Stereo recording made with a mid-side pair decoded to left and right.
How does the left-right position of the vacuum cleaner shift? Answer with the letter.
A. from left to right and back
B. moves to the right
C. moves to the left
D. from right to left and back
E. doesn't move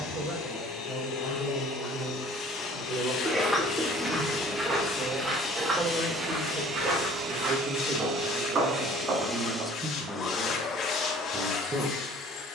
A.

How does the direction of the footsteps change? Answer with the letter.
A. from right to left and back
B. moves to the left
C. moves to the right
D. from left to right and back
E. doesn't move
C.